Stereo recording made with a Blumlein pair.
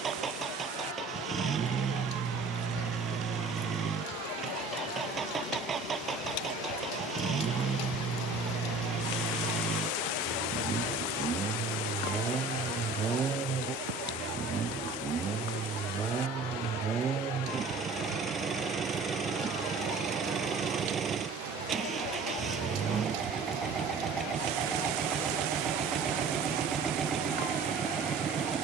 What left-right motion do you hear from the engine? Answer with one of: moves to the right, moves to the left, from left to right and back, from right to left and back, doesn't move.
doesn't move.